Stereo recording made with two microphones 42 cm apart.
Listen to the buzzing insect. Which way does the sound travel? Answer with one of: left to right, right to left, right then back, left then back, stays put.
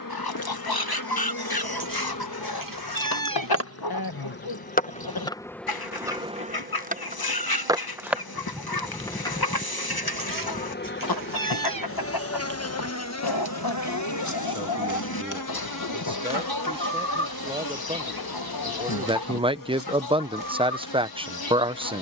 right then back.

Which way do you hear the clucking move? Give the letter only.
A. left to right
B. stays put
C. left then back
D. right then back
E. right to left
B.